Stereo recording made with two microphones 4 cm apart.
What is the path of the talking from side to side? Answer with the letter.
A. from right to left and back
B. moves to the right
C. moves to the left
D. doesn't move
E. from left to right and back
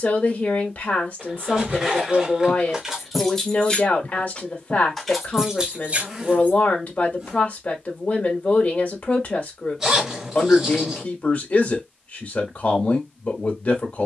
D.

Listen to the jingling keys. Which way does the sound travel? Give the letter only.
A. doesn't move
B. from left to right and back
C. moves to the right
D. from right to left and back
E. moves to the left
D.